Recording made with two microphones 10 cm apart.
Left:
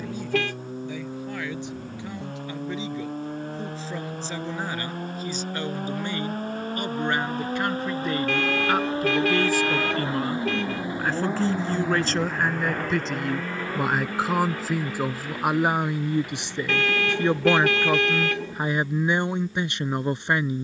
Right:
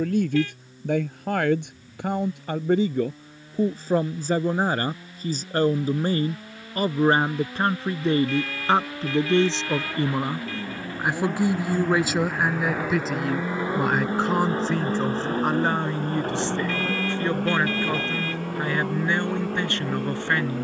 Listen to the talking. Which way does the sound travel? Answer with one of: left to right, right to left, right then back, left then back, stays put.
right to left.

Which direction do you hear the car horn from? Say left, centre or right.
left.